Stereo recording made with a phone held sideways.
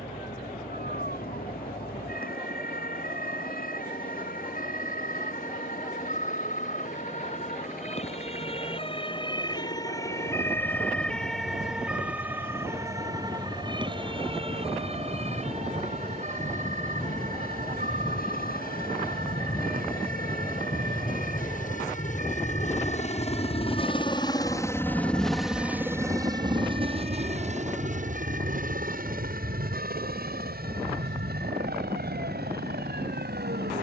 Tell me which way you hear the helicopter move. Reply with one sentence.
In this clip you hear the helicopter go from the left side to the right.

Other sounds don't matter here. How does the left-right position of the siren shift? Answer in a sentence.
In this clip you hear the siren travel towards the right.